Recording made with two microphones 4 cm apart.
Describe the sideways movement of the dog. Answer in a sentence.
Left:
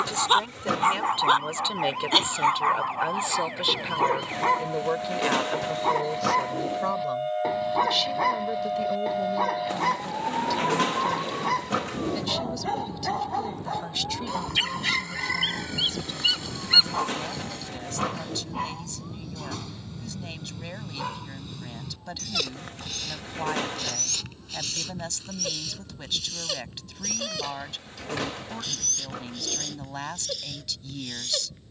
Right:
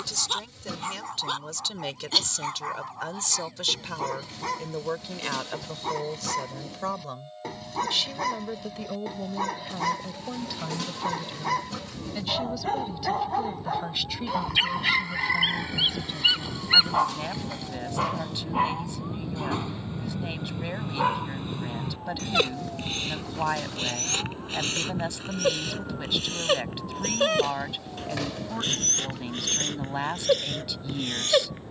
In this clip you hear the dog go from the left side to the right.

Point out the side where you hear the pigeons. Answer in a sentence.
In this clip you hear the pigeons on the left.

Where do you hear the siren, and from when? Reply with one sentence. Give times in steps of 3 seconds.
In this clip you hear the siren on the left from 0 s, in the centre from 15 s and on the right from 18 s.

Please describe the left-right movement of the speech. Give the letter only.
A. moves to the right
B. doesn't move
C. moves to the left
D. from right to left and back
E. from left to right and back
A.